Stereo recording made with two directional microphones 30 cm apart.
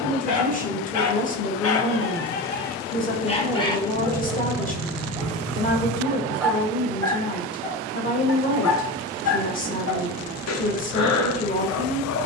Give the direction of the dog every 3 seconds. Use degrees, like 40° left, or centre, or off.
50° left, centre, 20° left, 60° left.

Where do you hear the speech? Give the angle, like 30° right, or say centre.
30° left.